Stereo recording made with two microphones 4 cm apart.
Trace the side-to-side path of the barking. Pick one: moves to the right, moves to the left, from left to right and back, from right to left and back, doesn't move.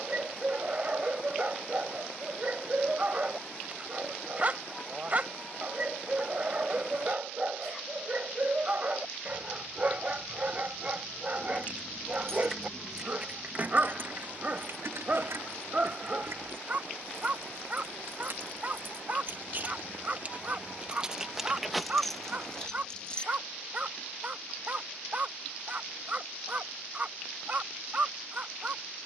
doesn't move.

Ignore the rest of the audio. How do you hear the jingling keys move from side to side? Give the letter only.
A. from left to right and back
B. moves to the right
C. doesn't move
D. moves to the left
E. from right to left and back
A.